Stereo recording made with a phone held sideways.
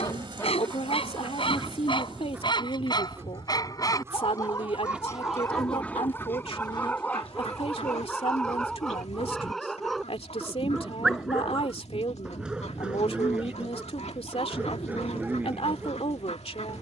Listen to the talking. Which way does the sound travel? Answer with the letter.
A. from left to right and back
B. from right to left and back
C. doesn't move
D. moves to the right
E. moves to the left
C.